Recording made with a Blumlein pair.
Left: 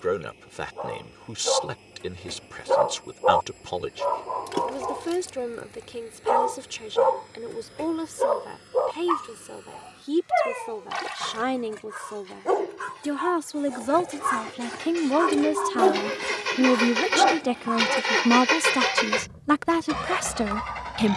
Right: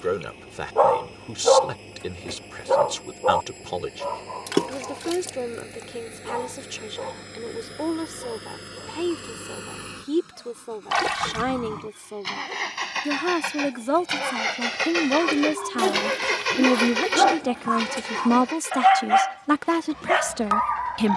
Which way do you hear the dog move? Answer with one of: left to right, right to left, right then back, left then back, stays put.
left then back.